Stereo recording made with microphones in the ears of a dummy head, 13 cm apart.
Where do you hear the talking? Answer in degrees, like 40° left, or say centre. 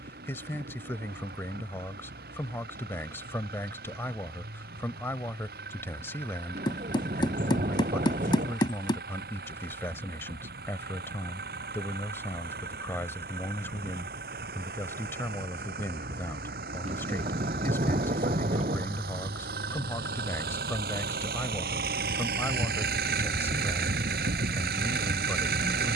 20° left.